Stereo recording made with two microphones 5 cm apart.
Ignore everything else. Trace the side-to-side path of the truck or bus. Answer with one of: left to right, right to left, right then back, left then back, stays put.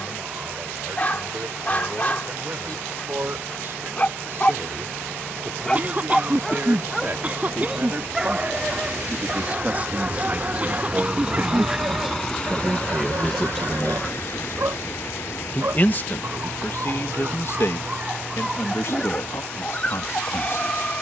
right to left.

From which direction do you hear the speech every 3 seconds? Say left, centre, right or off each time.
right, right, right, right, centre, left, left.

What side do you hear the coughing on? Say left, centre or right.
right.